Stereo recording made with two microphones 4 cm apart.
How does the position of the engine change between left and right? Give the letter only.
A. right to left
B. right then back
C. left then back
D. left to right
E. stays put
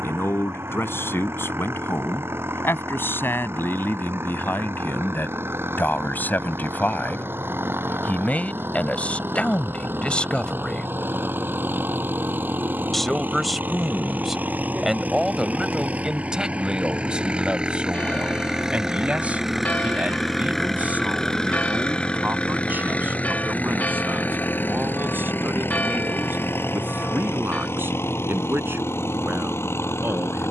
A.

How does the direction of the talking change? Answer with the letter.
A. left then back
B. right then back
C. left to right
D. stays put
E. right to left
C.